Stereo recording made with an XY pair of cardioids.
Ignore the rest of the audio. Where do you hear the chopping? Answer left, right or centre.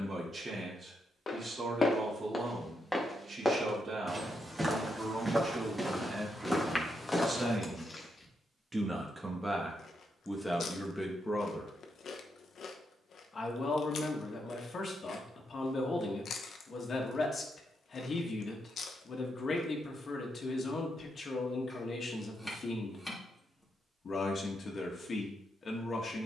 centre.